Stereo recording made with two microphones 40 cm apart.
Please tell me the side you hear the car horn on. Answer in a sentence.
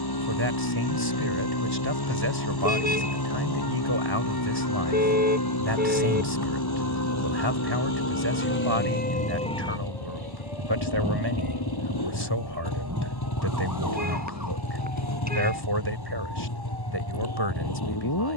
You can hear the car horn on the right.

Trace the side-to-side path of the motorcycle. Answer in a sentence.
In this clip you hear the motorcycle stay in one place.